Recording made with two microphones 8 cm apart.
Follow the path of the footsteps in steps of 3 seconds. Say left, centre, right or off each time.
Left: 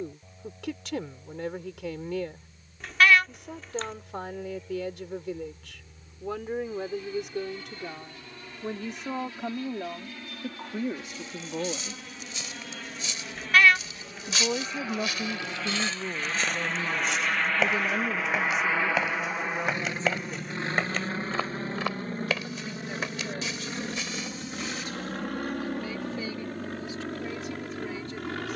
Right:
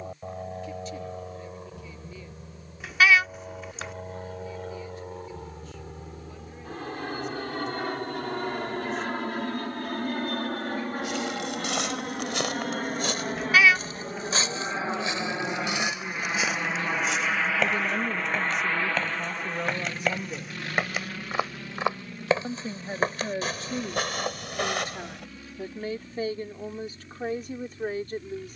off, off, off, right, right, centre, centre, right, right, off.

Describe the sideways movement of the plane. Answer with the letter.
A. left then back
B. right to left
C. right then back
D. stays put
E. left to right
B.